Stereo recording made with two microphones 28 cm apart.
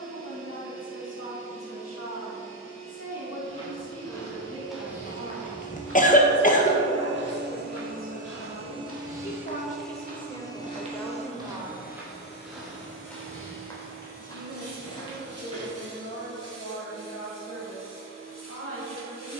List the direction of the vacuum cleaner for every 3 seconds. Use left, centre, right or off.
right, right, right, centre, left, left, left.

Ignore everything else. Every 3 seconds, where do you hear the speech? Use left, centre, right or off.
left, left, left, centre, right, right, right.